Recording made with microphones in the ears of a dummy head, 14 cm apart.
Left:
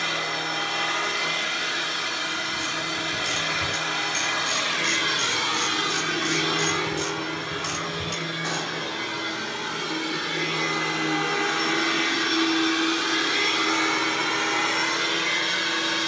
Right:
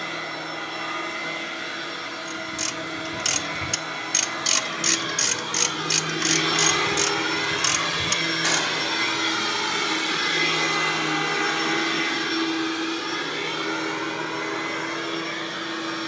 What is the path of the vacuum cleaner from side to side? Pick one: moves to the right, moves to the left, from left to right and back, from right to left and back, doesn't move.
from left to right and back.